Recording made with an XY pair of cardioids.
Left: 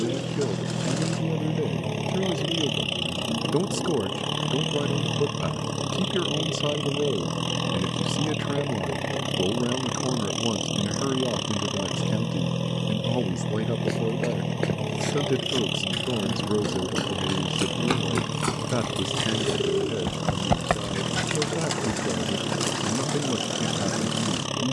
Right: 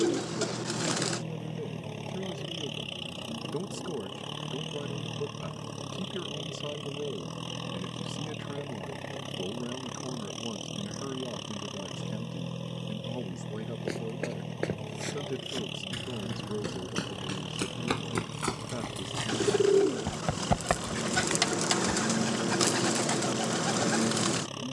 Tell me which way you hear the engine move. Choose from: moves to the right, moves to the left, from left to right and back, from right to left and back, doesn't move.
doesn't move.